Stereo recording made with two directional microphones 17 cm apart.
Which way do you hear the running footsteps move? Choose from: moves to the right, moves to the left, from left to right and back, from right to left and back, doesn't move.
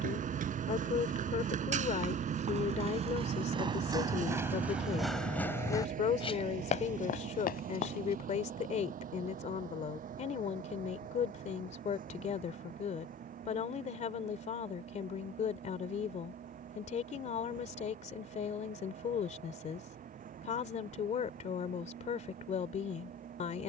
moves to the left.